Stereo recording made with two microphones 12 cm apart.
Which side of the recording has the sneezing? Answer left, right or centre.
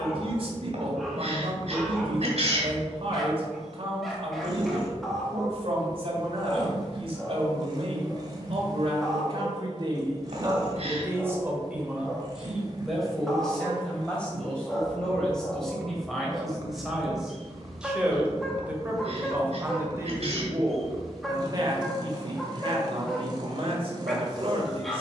right.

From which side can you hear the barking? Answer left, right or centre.
centre.